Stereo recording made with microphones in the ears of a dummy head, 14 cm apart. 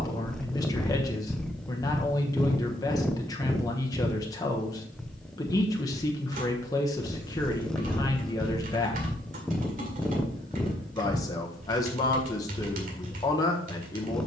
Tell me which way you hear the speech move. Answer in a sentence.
You can hear the speech stay in one place.